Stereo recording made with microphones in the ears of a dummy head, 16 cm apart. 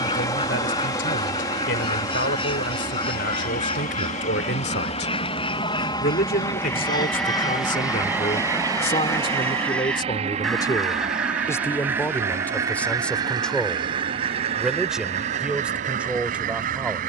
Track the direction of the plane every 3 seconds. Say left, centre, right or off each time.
left, left, centre, right, right, right.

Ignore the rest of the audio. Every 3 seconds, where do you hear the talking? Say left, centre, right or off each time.
left, left, left, left, centre, centre.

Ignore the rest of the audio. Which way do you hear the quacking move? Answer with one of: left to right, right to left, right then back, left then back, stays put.
left to right.